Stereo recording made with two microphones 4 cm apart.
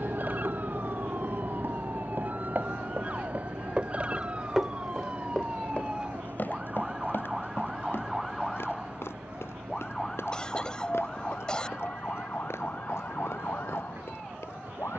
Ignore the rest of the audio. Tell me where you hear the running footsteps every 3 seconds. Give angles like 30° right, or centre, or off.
60° right, 10° right, 60° left, 70° left, 80° left.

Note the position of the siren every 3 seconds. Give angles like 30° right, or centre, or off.
40° right, 30° right, 10° right, 20° left, 40° left.